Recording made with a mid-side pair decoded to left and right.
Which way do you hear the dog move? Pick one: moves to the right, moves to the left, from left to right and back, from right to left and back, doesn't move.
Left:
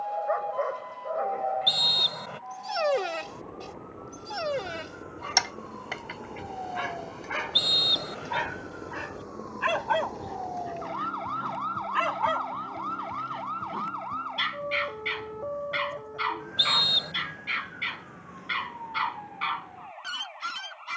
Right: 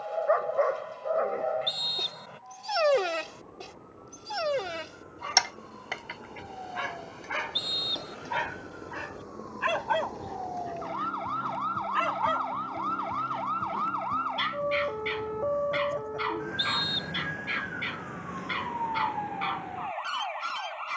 moves to the left.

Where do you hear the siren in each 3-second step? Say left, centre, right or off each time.
left, left, left, centre, right, right, right.